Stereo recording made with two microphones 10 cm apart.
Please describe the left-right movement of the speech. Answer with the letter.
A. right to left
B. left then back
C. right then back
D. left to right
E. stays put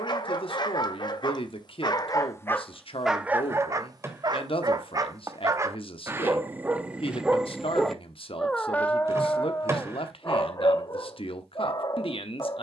E.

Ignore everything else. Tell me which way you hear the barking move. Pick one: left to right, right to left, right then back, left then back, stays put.
right then back.